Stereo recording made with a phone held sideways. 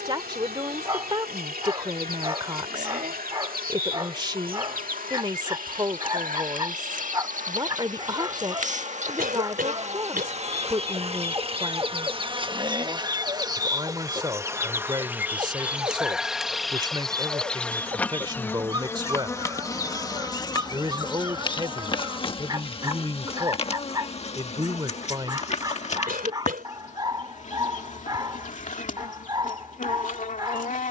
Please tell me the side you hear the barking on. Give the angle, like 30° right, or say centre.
30° right.